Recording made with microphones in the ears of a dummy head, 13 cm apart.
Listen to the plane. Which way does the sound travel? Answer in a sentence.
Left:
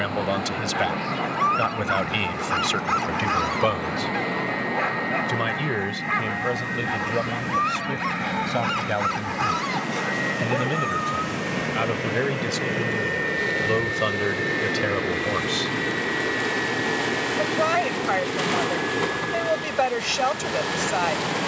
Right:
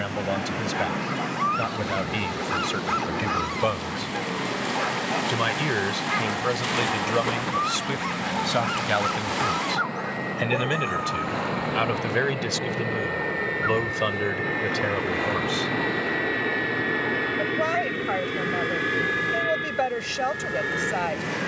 In this clip you hear the plane travel towards the right.